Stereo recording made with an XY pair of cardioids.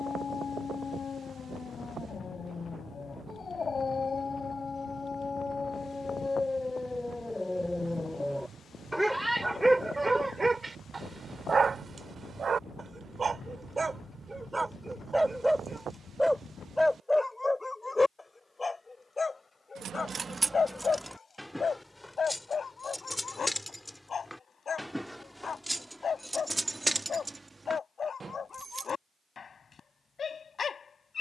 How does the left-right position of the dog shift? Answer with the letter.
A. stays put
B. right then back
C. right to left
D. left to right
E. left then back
B.